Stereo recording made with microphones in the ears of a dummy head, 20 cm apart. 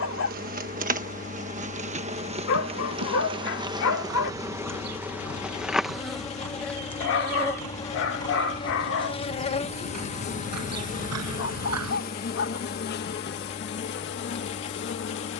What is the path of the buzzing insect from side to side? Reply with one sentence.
You can hear the buzzing insect travel towards the left.